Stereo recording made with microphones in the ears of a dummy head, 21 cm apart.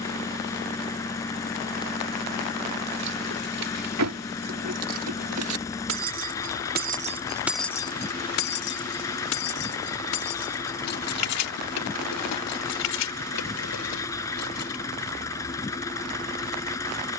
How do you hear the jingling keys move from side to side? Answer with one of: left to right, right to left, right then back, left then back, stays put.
right to left.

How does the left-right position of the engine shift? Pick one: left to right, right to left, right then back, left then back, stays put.
stays put.